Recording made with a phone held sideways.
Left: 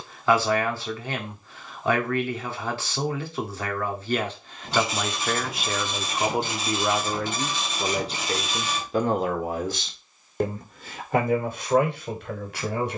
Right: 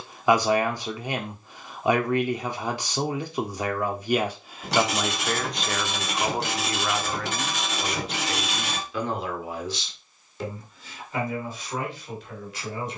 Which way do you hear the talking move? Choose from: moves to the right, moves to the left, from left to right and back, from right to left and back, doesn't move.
moves to the left.